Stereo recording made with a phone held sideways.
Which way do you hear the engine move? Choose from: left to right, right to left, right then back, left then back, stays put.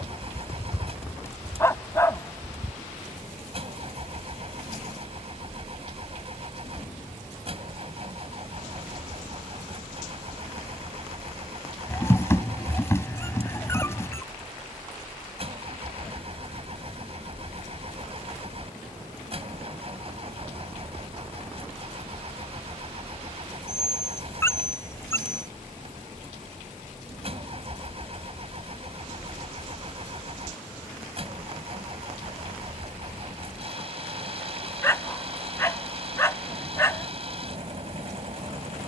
stays put.